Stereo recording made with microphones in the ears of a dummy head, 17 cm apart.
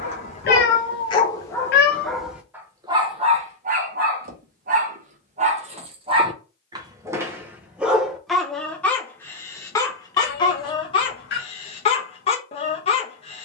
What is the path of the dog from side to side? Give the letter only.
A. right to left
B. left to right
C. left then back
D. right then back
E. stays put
D.